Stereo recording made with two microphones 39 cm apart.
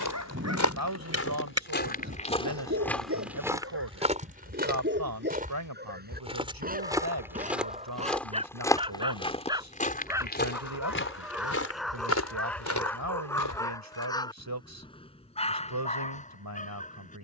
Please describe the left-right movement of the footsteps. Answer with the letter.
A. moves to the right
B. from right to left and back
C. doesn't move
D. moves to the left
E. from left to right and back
E.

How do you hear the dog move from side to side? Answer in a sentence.
You can hear the dog travel towards the left.